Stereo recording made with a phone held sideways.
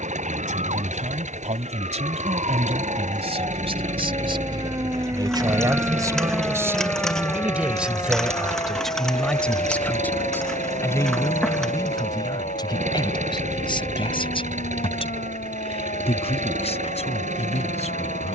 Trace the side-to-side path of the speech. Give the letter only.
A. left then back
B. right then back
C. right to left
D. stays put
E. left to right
C.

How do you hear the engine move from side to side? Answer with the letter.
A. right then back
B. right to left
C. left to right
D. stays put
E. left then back
D.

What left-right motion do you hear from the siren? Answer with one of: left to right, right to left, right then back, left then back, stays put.
right to left.